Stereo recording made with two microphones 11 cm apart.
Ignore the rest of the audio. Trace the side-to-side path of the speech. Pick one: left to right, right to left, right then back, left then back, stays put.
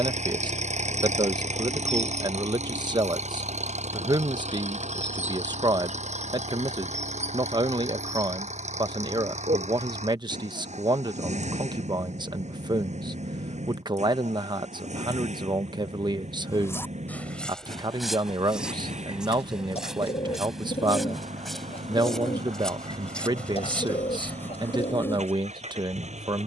stays put.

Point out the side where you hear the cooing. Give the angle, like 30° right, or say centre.
60° left.